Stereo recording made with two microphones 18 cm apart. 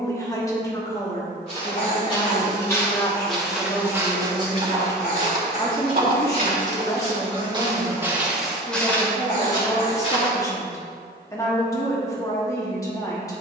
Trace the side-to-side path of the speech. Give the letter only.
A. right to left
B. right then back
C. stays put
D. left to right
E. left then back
C.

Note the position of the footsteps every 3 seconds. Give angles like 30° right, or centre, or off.
20° left, 20° right, 20° right, 20° left, off.